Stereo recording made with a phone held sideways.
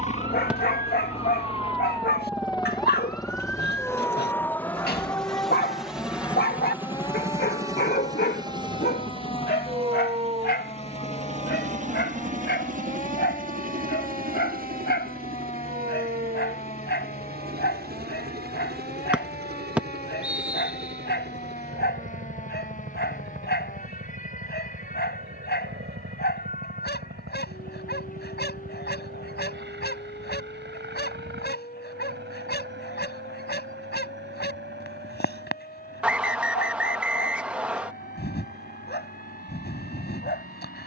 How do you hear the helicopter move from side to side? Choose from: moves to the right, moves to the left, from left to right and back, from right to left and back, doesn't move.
moves to the right.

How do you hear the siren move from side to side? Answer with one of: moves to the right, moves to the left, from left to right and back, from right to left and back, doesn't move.
moves to the left.